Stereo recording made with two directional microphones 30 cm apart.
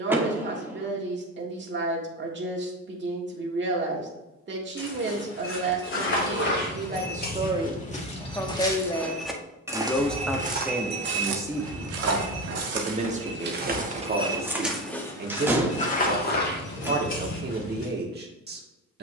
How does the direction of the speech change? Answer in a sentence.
You can hear the speech go left and come back.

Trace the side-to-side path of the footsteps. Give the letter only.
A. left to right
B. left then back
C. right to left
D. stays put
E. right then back
E.